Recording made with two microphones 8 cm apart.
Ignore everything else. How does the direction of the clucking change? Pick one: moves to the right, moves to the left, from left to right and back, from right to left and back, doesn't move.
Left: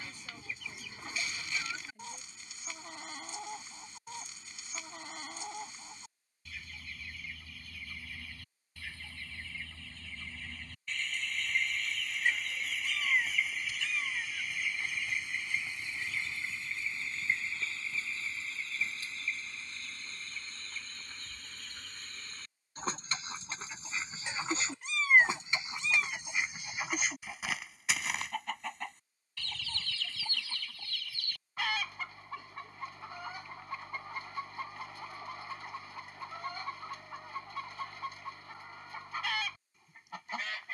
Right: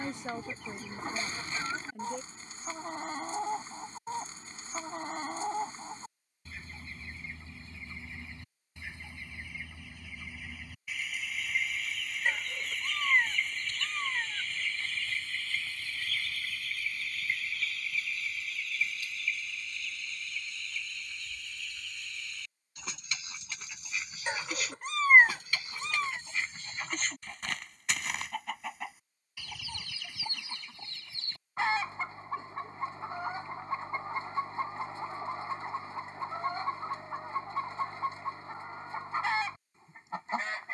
from right to left and back.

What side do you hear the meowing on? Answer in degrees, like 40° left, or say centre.
40° right.